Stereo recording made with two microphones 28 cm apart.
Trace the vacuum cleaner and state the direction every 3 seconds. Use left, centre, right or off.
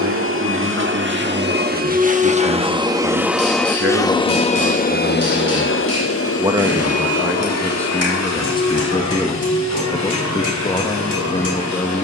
right, left, left, left.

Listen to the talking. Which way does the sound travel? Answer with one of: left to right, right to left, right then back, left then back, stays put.
right to left.